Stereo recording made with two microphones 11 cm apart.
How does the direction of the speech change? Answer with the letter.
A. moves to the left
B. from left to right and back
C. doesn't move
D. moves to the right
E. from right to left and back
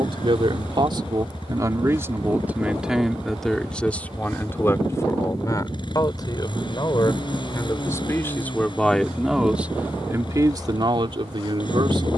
E.